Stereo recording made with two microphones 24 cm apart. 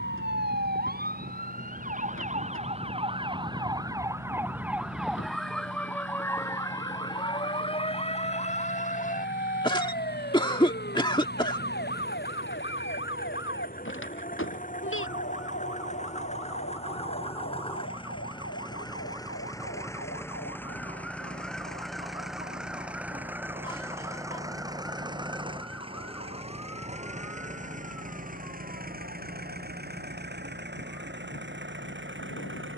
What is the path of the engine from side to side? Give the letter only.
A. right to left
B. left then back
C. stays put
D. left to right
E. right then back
D.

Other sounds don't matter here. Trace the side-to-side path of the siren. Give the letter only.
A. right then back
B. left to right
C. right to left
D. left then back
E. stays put
C.